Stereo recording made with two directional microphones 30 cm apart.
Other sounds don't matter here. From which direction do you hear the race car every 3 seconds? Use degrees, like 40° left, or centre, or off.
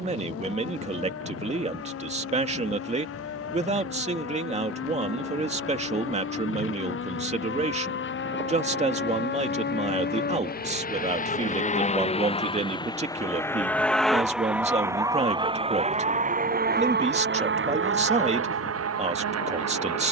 60° left, 60° left, 50° left, 30° left, 10° left, 30° right, 50° right.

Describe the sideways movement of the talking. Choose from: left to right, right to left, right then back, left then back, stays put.
stays put.